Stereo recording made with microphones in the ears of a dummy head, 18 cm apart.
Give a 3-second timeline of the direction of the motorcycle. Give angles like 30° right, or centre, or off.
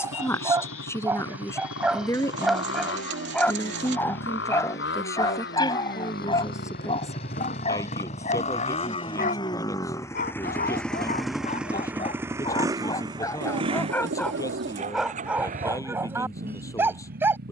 70° left, 60° left, 40° left, 10° left, 20° right, 40° right.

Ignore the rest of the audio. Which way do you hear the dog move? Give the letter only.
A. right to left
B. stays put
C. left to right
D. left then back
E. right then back
D.